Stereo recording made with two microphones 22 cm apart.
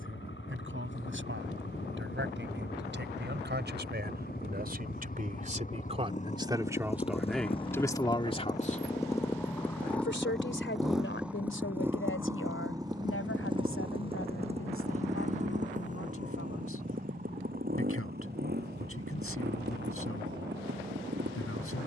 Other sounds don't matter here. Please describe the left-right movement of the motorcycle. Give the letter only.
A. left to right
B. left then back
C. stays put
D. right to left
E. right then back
A.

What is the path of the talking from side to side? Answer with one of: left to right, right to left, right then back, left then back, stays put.
right to left.